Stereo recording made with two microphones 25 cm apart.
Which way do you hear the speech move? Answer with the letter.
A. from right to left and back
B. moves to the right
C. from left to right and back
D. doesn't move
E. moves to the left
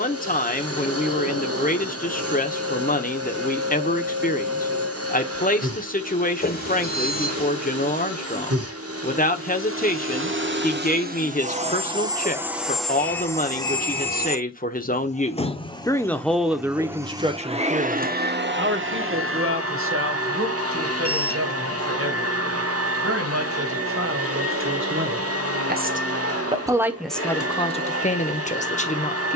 C.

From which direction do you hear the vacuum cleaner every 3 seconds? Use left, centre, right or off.
right, right, right, right, centre, centre, right, right, right, right.